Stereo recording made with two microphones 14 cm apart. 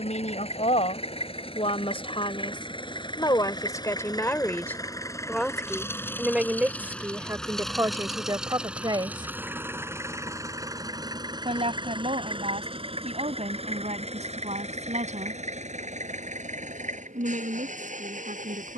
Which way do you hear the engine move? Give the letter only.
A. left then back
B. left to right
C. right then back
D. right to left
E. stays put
B.